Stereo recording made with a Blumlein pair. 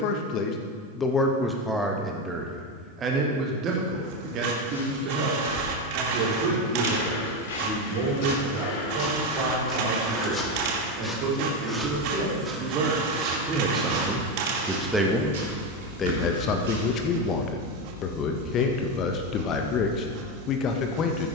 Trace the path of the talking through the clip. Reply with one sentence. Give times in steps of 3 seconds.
You can hear the talking in the centre from 0 s, on the right from 3 s and on the left from 15 s.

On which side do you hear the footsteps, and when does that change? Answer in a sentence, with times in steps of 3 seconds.
In this clip you hear the footsteps not at all from 0 s, on the left from 3 s, in the centre from 9 s, on the right from 12 s and not at all from 18 s.